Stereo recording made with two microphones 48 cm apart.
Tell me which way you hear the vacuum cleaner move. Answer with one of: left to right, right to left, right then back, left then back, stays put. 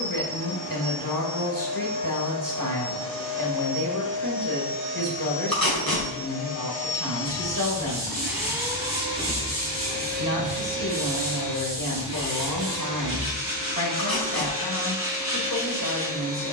left to right.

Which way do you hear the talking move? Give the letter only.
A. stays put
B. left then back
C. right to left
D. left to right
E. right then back
A.